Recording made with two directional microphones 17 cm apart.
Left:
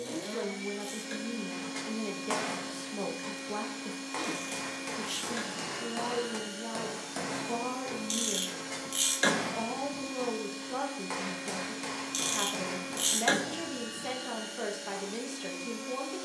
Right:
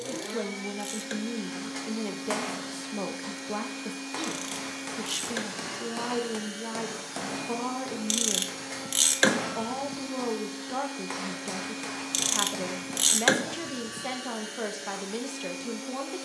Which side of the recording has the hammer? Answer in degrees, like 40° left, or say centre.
10° right.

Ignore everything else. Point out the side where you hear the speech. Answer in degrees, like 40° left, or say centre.
20° right.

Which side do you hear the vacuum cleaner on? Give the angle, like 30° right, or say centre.
50° right.